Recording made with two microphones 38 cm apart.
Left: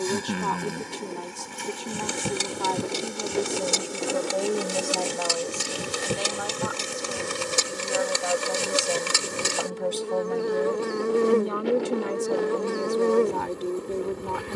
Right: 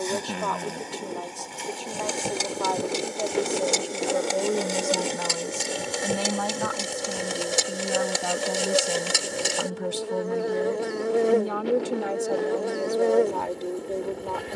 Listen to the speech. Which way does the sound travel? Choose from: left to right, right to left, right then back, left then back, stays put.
right then back.